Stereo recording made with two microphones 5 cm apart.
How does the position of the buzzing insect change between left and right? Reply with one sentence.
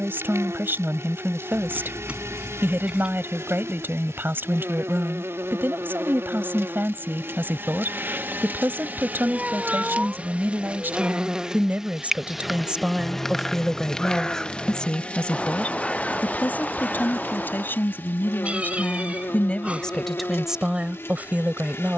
In this clip you hear the buzzing insect move from right to left.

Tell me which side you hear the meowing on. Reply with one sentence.
You can hear the meowing on the right.